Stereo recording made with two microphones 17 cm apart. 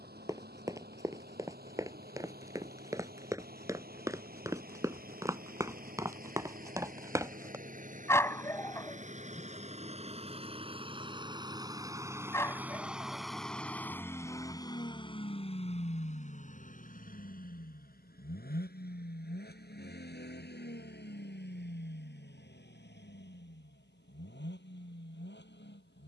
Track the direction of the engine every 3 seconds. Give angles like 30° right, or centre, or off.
60° right, 60° right, 50° right, 30° right, centre, 50° left, 70° left, 80° left, 80° left.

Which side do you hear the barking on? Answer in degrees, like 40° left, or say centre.
20° left.